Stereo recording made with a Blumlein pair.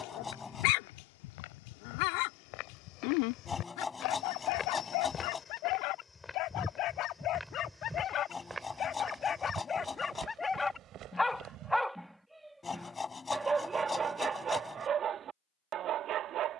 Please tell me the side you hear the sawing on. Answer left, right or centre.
centre.